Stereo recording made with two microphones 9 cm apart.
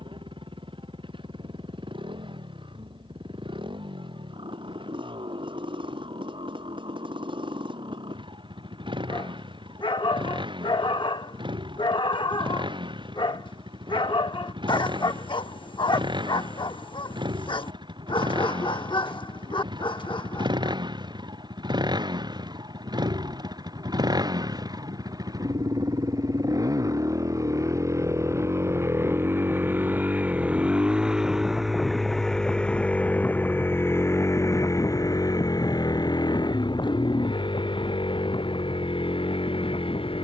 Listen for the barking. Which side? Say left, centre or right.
left.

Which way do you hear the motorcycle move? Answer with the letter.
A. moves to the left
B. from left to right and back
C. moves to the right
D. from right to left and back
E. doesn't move
A.